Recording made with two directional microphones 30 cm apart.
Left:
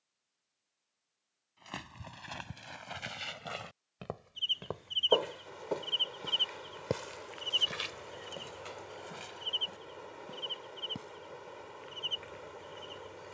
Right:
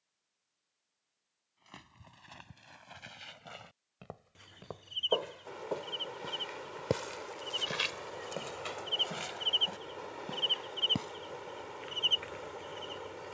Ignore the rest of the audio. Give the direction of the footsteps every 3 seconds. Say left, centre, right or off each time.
left, left, right, right, off.